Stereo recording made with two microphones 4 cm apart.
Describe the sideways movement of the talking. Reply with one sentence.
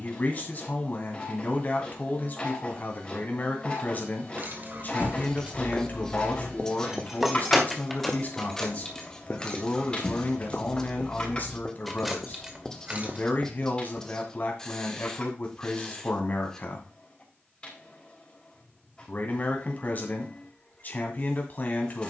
In this clip you hear the talking stay put.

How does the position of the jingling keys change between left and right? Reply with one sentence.
In this clip you hear the jingling keys go left and come back.